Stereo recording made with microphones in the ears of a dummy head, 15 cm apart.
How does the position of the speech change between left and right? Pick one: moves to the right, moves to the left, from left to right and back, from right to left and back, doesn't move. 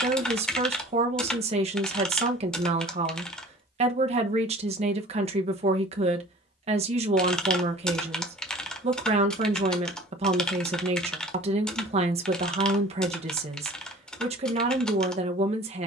doesn't move.